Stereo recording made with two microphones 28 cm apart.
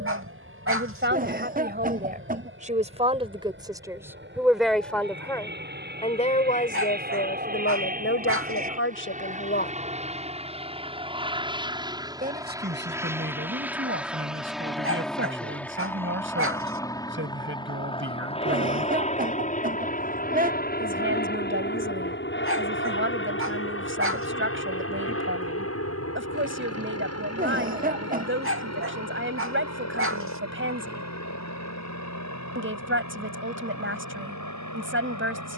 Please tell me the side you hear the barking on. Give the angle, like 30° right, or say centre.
50° right.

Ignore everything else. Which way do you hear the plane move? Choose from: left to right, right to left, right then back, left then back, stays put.
right to left.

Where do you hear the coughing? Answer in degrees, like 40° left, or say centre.
30° right.